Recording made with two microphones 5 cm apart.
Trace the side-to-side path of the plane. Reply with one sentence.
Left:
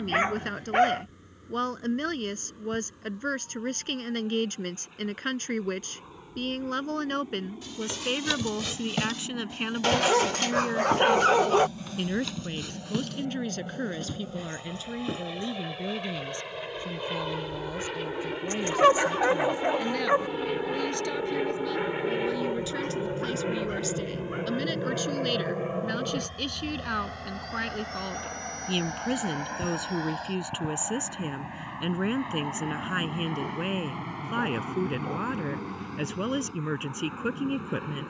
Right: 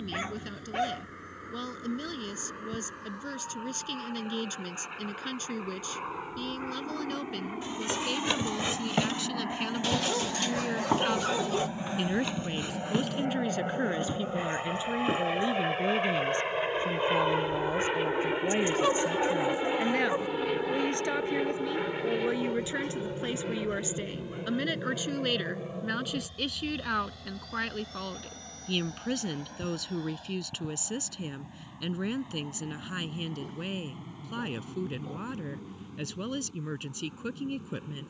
You can hear the plane travel towards the left.